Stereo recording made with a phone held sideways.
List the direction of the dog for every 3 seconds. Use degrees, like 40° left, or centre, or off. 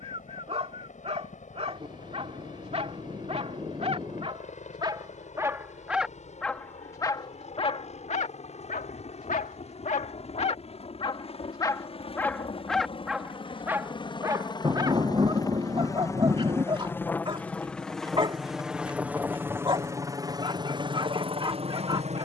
40° right, 30° right, 30° left, 40° left, 10° right, 30° right, 30° right, 30° right.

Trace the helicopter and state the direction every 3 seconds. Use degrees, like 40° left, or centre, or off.
50° left, 50° left, 40° left, 40° left, 30° left, 20° left, 10° right, 40° right.